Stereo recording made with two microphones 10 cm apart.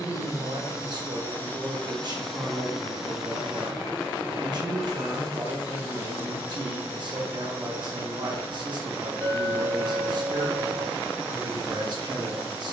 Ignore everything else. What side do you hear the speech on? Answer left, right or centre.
right.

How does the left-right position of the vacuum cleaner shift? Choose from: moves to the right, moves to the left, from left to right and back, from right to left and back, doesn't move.
moves to the right.